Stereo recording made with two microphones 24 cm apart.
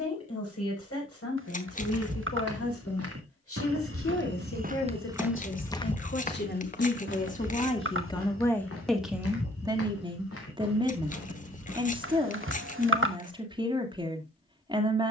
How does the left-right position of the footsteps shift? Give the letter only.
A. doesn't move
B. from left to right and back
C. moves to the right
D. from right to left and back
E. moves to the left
E.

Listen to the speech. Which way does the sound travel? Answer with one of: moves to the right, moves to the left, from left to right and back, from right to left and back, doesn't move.
moves to the right.